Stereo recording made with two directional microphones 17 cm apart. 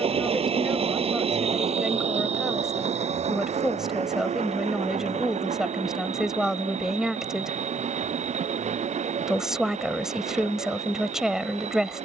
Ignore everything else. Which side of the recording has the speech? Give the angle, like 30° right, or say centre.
centre.